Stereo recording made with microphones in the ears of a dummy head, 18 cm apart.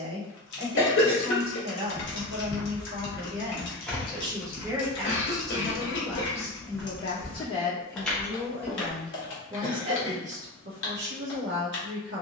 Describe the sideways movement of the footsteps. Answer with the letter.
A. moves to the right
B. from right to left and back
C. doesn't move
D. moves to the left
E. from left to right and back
E.